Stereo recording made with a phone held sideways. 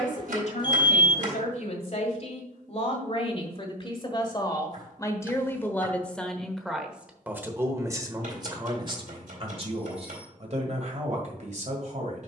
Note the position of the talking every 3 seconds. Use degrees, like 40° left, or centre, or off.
60° left, 30° left, 20° right, 50° right.